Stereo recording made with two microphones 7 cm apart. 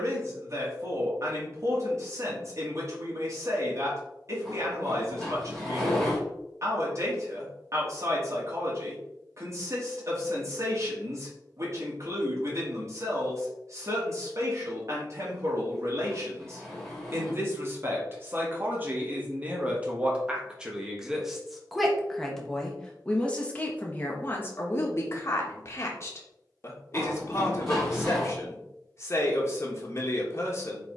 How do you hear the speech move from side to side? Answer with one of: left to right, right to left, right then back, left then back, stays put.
right to left.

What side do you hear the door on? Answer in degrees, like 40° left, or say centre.
centre.